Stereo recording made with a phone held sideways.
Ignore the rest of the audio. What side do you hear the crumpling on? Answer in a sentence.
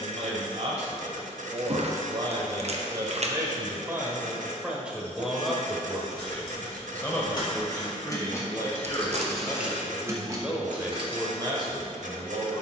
In this clip you hear the crumpling on the right.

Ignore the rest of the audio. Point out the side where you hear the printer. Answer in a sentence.
In this clip you hear the printer on the right.